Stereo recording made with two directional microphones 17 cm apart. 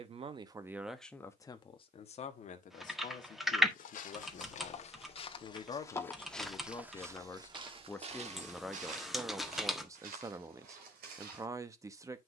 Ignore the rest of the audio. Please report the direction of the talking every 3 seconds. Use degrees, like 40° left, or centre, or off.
10° left, 40° left, 10° left, 20° right.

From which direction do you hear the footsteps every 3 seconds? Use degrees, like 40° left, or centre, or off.
off, 40° left, 20° right, 60° right.